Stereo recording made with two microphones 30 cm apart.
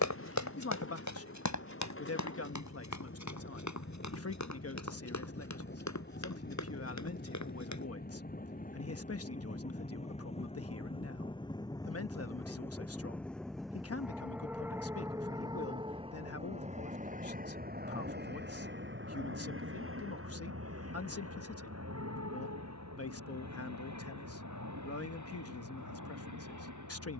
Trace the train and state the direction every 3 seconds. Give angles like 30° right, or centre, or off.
50° left, 40° left, 30° left, 20° left, centre, 20° right, 40° right, 60° right, 70° right.